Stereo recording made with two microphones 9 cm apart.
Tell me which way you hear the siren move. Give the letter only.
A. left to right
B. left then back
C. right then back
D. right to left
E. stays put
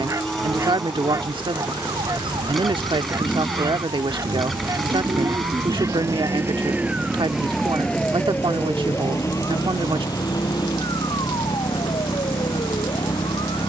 D.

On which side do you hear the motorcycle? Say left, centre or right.
centre.